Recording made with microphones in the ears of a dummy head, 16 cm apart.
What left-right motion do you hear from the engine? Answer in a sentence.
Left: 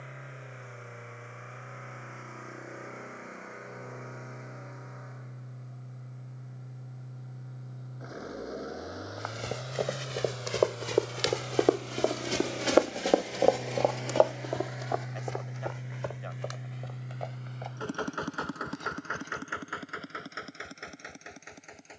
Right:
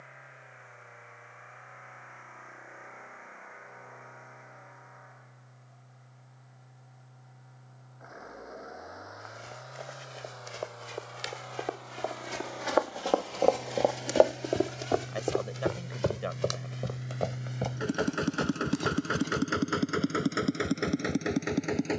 You can hear the engine travel towards the right.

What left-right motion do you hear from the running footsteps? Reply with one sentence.
In this clip you hear the running footsteps go from the left side to the right.